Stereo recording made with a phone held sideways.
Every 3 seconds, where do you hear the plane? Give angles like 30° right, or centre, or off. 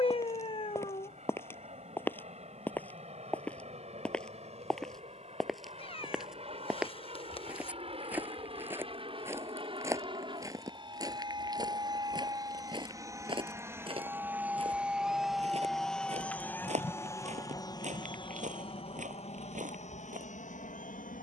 50° right, 50° right, 40° right, 30° right, 20° right, 10° left, 50° left.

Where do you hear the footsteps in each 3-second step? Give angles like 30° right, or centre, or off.
20° left, centre, 10° right, 20° right, 30° right, 50° right, 60° right.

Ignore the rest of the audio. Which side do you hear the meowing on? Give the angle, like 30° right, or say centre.
40° left.